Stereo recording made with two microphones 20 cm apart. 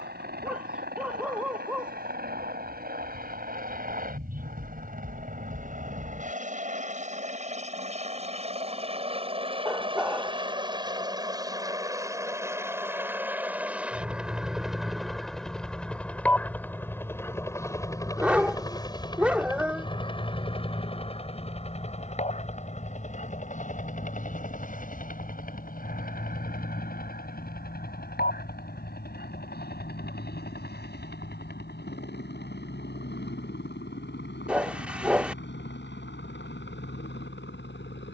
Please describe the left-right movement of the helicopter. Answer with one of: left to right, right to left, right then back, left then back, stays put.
right to left.